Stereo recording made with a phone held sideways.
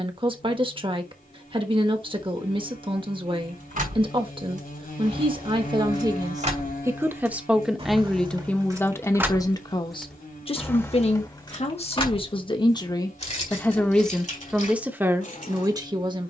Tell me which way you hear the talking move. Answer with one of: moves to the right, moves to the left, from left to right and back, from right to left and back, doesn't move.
from right to left and back.